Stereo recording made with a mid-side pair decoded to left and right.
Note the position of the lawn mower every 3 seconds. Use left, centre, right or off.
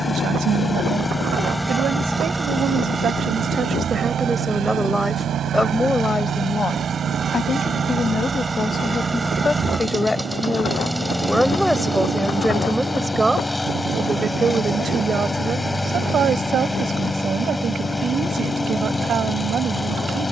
centre, right, right, centre, centre, centre, centre.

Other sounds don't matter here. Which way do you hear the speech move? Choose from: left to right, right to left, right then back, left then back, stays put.
left then back.